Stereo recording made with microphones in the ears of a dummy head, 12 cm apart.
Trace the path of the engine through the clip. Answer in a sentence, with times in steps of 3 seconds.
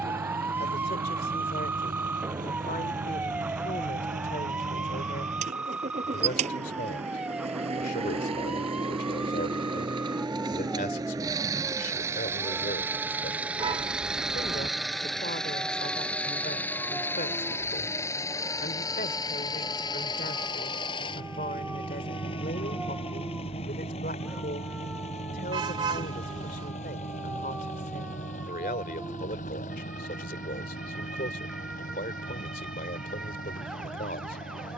You can hear the engine on the right from 0 s, in the centre from 12 s and on the left from 18 s.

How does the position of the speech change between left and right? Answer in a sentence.
You can hear the speech stay in one place.